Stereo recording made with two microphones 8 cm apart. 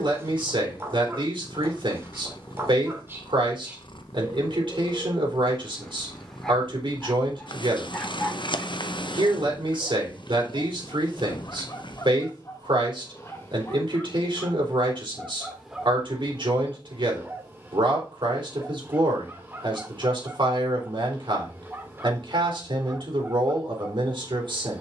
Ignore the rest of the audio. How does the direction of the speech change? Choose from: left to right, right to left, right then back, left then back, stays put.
stays put.